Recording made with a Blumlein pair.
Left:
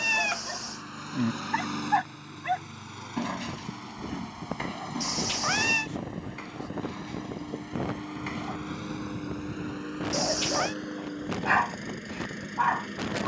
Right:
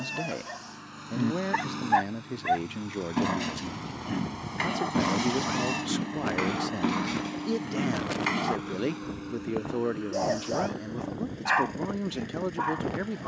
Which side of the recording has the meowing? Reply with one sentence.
You can hear the meowing on the left.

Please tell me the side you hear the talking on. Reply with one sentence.
In this clip you hear the talking on the right.